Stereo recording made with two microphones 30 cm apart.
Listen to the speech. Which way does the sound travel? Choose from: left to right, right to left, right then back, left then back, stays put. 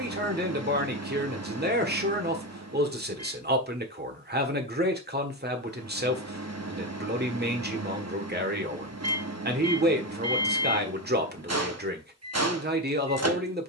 stays put.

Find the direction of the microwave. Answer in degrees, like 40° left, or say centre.
60° right.